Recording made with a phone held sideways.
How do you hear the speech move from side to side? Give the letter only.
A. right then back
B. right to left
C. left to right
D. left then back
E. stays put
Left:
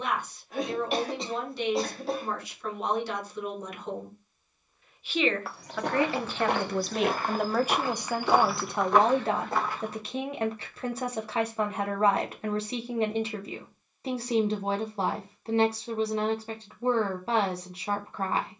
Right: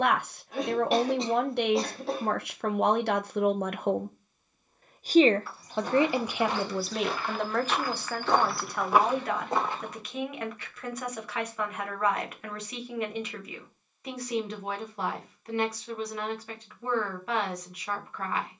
B.